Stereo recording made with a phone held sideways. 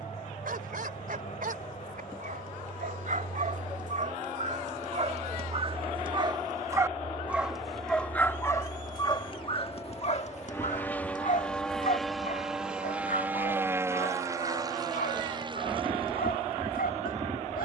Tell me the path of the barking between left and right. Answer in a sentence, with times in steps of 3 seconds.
In this clip you hear the barking on the right from 0 s, in the centre from 6 s and on the left from 9 s.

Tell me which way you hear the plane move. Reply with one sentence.
In this clip you hear the plane go from the left side to the right.